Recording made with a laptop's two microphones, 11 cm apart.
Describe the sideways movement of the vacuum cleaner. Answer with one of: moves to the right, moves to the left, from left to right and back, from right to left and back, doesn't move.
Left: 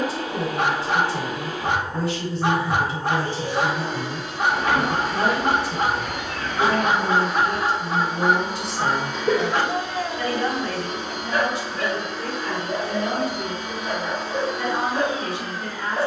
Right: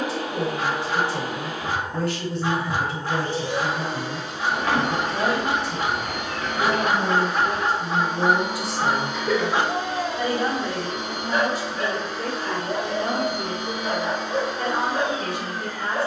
doesn't move.